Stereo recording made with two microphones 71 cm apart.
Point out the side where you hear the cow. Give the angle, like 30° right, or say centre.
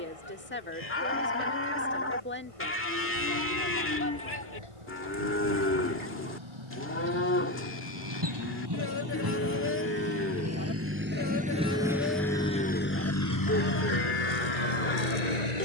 20° left.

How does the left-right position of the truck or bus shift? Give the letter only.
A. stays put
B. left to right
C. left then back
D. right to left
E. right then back
D.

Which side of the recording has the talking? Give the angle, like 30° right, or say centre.
20° left.